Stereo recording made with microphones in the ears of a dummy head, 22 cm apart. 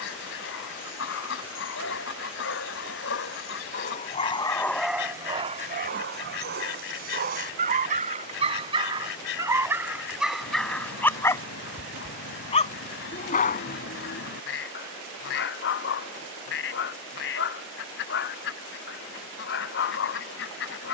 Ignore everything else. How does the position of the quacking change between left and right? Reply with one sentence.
In this clip you hear the quacking stay in one place.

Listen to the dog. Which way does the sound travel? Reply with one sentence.
You can hear the dog go right and come back.